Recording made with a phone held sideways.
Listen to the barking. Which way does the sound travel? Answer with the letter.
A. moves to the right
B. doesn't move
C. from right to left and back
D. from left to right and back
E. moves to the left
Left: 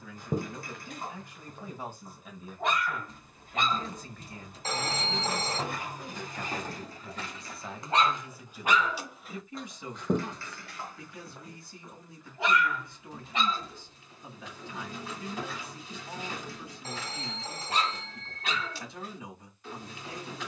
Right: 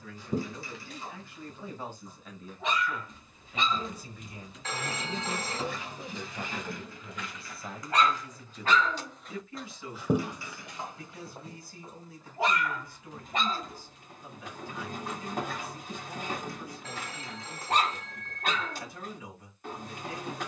A.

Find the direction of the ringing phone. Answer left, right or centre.
left.